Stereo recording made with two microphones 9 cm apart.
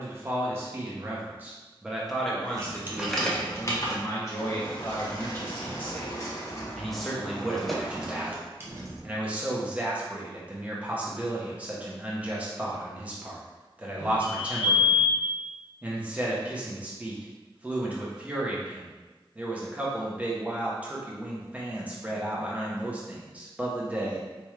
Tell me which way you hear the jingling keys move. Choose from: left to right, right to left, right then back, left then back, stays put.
left then back.